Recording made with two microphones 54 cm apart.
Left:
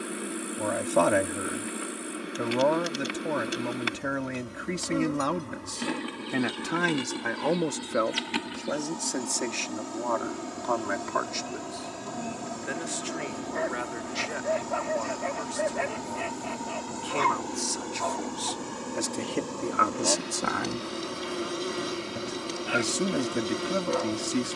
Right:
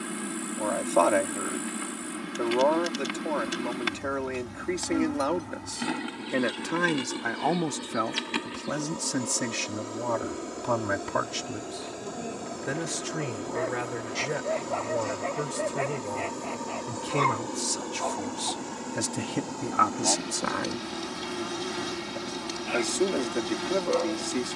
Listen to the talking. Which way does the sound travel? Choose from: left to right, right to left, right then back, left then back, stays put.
right then back.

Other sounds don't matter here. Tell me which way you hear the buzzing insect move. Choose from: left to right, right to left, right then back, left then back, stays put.
left then back.